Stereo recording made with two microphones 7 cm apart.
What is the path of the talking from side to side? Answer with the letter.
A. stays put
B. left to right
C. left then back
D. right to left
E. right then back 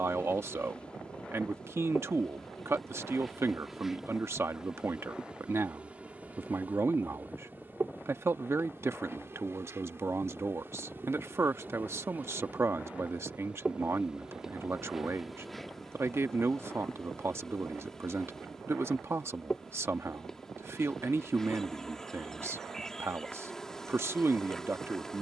A.